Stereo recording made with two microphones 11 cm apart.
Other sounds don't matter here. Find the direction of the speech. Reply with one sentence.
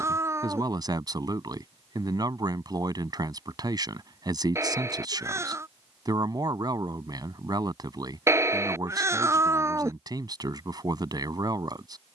In this clip you hear the speech on the right.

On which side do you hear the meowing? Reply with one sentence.
In this clip you hear the meowing on the right.